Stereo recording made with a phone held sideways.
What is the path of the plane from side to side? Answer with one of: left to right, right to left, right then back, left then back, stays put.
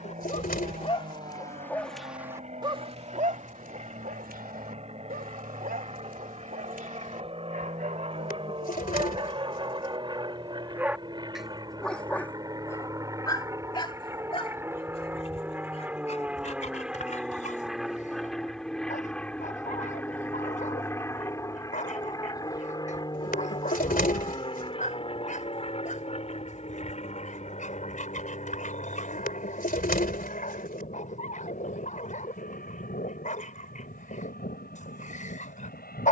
right to left.